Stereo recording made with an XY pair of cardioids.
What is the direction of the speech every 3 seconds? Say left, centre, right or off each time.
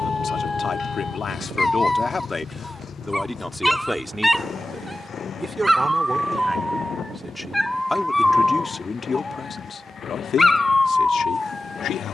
left, centre, centre, left.